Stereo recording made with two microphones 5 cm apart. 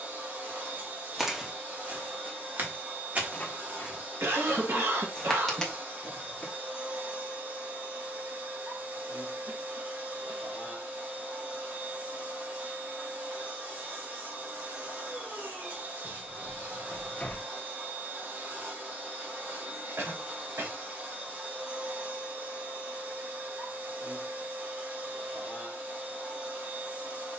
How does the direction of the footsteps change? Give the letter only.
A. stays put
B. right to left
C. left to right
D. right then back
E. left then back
D.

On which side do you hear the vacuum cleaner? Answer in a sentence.
You can hear the vacuum cleaner on the right.